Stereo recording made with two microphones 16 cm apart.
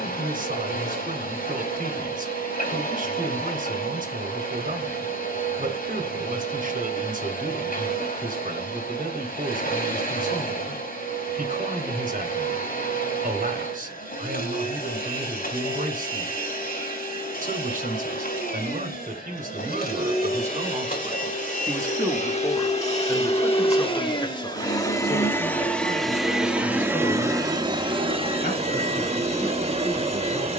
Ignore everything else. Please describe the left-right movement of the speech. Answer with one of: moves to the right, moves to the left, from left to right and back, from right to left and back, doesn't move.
moves to the left.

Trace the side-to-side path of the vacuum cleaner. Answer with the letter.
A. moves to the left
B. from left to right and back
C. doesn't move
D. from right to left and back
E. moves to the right
E.